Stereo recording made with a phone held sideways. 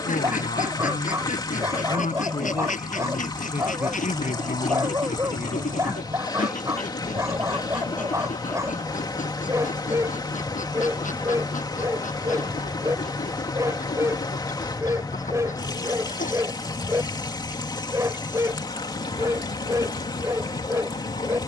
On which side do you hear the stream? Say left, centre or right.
left.